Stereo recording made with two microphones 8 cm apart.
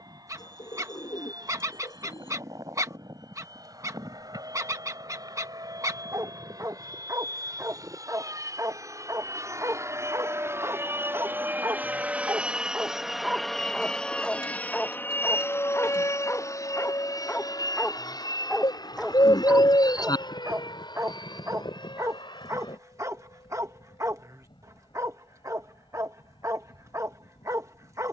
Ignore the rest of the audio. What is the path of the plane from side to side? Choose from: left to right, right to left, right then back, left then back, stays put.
right to left.